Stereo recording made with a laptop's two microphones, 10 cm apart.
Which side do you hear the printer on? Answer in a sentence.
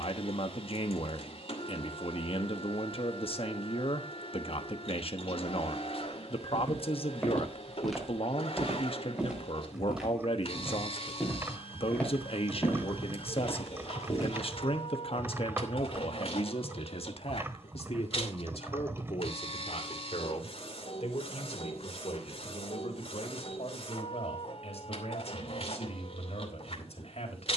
In this clip you hear the printer on the left.